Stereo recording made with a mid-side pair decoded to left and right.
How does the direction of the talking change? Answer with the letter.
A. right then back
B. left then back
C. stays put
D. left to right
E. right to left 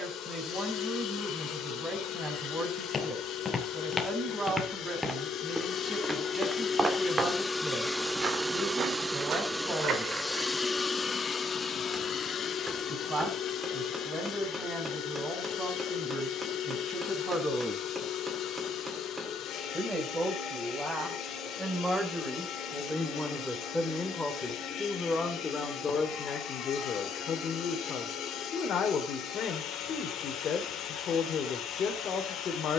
E.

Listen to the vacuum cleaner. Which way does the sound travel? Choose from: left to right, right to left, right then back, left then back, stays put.
right then back.